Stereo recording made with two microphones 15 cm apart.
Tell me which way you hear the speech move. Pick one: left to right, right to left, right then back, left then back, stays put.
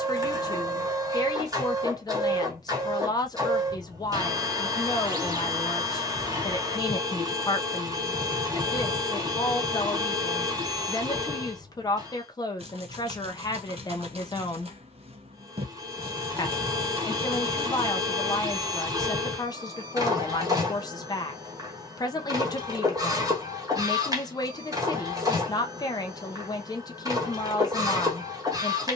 stays put.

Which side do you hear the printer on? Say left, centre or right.
right.